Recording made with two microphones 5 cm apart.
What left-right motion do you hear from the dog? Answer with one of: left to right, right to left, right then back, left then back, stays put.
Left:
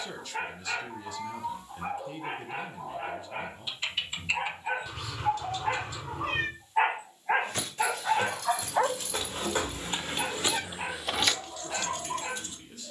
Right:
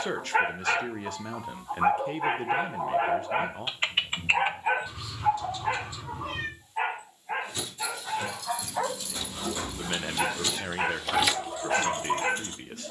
left then back.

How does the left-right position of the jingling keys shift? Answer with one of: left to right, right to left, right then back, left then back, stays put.
left to right.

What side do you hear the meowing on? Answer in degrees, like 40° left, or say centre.
70° left.